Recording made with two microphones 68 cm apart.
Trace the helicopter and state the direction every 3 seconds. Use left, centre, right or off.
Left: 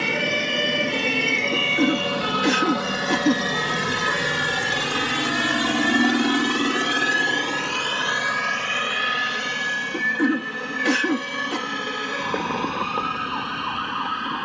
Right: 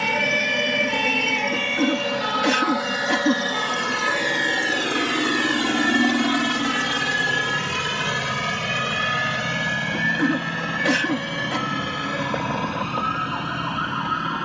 left, left, right, right, right.